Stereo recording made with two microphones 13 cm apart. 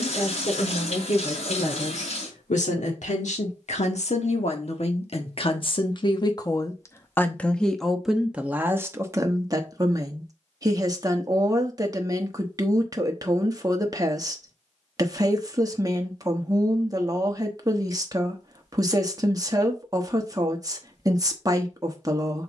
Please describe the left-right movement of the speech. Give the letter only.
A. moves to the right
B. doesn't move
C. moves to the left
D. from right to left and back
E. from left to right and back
A.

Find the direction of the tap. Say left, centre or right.
left.